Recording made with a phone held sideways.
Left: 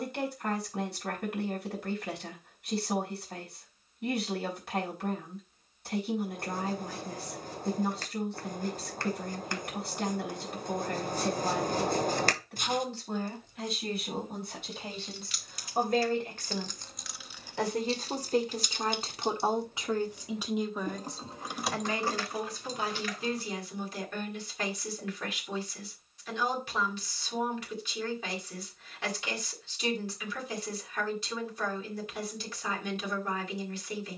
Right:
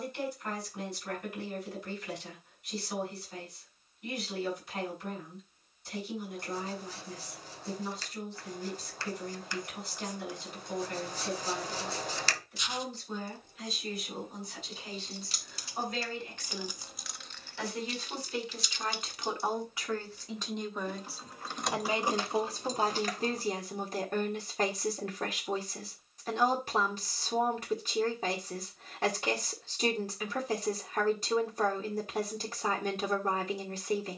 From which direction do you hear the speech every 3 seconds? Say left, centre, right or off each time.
left, left, left, left, left, left, left, right, right, right, right, right.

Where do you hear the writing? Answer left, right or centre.
left.